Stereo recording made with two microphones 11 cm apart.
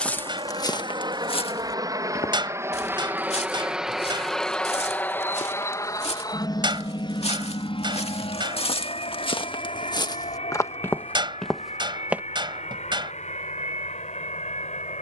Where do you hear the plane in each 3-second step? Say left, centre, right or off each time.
right, centre, left, left, left.